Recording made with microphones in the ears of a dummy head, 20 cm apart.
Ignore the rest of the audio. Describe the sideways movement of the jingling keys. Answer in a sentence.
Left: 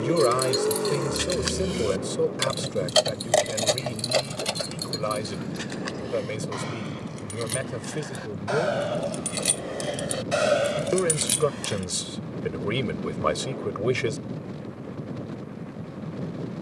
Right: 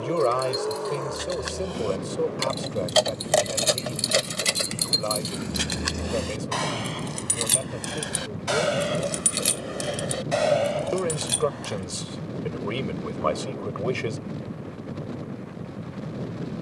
In this clip you hear the jingling keys move from left to right and back again.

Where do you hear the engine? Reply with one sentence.
You can hear the engine on the left.